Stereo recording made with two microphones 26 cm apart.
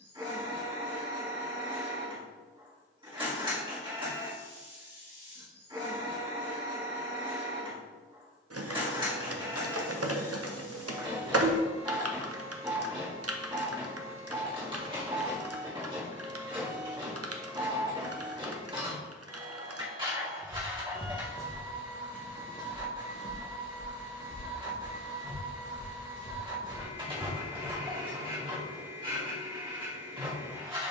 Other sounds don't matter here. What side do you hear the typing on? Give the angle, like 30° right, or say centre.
70° right.